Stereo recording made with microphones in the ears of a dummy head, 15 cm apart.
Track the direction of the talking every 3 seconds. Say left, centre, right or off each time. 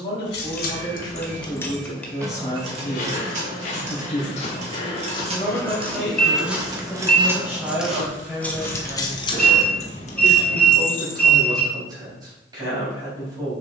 left, centre, centre, right, right.